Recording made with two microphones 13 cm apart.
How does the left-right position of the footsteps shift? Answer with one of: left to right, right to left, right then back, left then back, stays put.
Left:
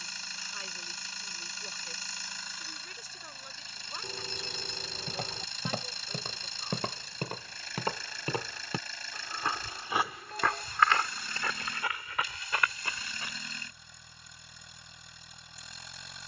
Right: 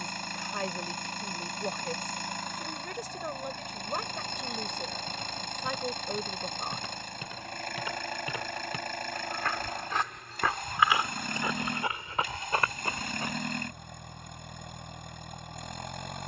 left to right.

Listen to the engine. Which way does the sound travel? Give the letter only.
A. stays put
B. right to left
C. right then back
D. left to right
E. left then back
A.